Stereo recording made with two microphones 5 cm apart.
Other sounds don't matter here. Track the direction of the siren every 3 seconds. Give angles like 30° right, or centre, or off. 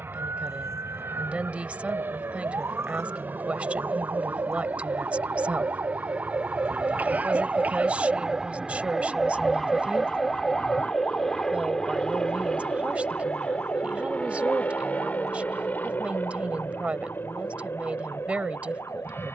80° right, 70° right, 30° right, 30° left, 50° left, 70° left, 70° left.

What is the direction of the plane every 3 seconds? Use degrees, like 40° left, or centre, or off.
50° right, 40° right, 20° right, centre, 20° left, 40° left, 50° left.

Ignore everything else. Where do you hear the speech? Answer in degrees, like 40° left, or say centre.
30° right.